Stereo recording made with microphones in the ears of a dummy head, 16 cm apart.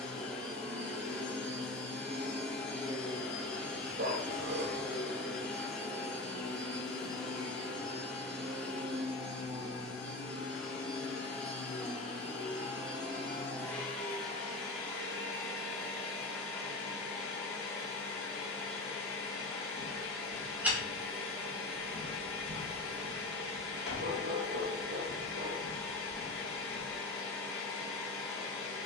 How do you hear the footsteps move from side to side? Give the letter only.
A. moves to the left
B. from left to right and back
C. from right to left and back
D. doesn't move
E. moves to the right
C.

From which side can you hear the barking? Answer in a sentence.
You can hear the barking on the right.